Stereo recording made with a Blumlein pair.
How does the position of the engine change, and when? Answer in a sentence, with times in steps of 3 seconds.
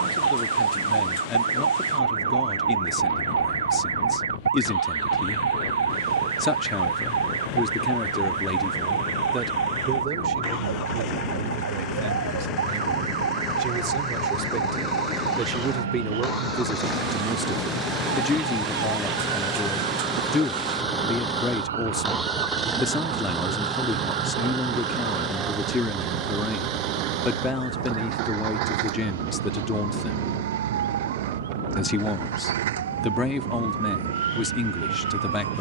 In this clip you hear the engine on the left from 0 s, in the centre from 18 s and on the right from 24 s.